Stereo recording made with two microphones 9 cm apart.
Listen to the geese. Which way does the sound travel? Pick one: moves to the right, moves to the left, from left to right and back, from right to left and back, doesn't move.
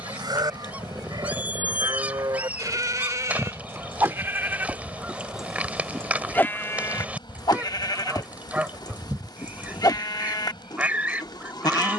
doesn't move.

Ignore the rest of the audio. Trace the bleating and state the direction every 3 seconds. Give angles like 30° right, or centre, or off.
50° right, 20° right, 40° left, 50° left.